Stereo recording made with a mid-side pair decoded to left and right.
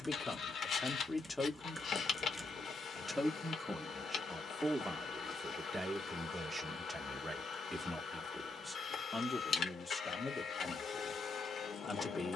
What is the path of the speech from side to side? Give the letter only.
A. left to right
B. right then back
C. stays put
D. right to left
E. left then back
B.